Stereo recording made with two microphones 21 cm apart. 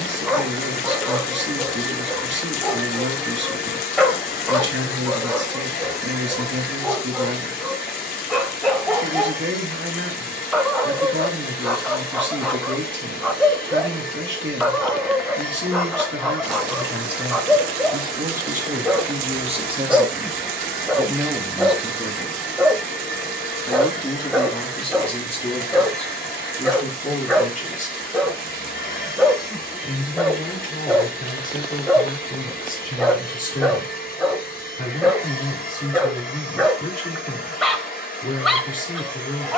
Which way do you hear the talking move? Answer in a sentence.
In this clip you hear the talking go from the right side to the left.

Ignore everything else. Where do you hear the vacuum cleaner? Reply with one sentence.
You can hear the vacuum cleaner on the left.